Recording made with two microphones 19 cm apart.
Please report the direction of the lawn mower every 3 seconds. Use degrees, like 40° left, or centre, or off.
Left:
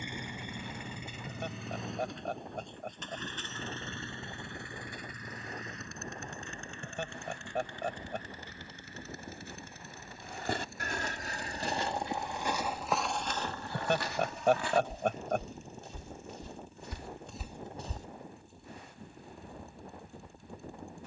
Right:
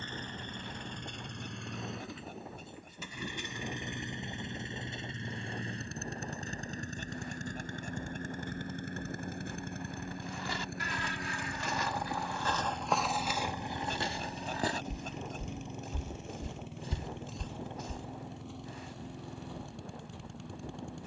centre, 20° right, 40° right, 60° right, 70° right, 80° right, 80° right.